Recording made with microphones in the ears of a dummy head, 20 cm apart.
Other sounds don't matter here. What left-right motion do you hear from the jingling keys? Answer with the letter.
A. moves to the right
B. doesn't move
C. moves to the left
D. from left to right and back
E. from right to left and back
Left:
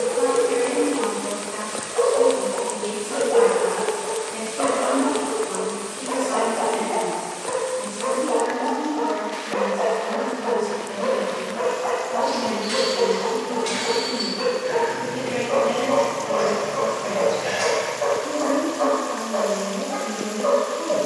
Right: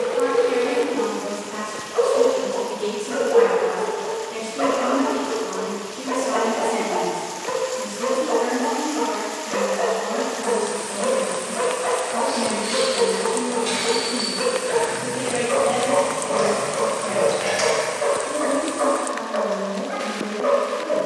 A.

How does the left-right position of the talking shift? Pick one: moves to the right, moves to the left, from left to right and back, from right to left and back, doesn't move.
moves to the left.